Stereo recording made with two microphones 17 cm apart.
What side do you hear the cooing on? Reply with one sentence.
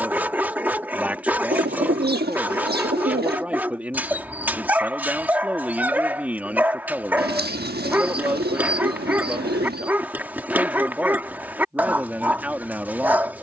In this clip you hear the cooing on the right.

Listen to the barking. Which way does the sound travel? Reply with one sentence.
You can hear the barking stay put.